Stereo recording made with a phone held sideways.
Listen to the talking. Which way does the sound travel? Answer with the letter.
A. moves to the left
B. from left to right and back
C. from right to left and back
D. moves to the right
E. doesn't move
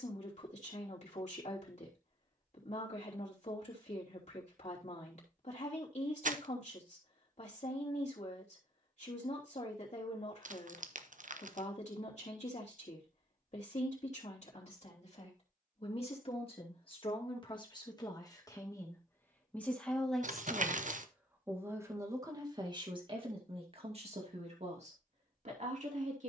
D.